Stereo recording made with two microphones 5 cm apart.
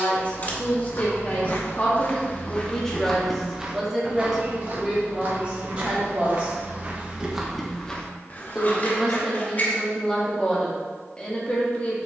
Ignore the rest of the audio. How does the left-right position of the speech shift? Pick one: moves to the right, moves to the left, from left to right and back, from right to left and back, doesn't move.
from left to right and back.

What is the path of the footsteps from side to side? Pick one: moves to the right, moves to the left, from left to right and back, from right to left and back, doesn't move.
from left to right and back.